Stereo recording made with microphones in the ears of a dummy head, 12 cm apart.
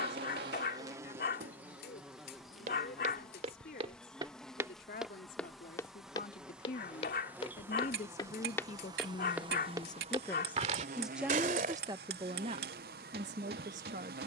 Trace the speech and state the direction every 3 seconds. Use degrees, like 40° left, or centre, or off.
70° left, 70° left, 60° left, 10° left, 50° right.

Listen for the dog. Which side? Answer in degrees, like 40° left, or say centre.
70° left.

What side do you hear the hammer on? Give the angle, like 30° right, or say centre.
80° right.